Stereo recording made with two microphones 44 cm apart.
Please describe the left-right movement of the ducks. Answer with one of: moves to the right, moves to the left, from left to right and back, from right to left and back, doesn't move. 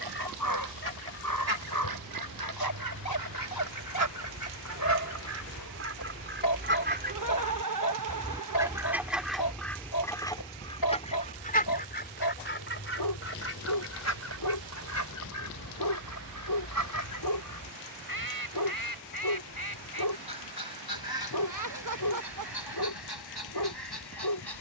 moves to the left.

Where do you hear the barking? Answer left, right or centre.
left.